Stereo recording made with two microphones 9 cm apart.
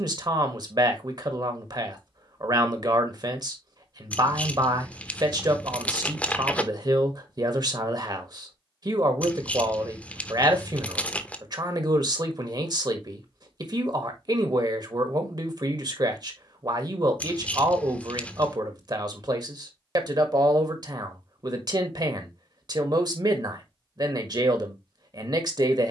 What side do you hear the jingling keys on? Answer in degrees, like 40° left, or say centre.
10° left.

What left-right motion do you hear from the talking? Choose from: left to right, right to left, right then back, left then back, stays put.
stays put.